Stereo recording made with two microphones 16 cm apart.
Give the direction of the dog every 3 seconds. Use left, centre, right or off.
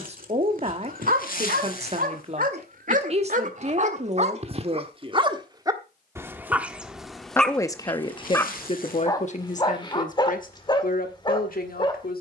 right, right, centre, left.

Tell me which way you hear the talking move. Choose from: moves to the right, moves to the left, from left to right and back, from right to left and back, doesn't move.
moves to the left.